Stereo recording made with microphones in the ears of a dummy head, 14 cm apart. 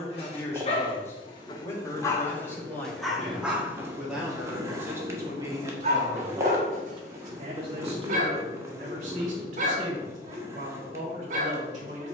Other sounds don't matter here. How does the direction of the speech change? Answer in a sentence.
You can hear the speech travel towards the right.